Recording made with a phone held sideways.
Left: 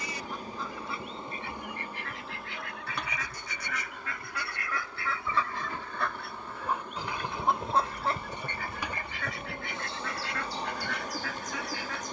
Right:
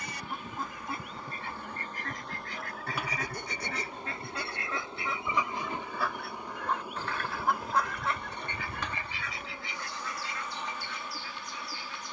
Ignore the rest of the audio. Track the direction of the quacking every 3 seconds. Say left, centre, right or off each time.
right, right, left, left.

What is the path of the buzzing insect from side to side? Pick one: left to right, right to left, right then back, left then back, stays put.
right then back.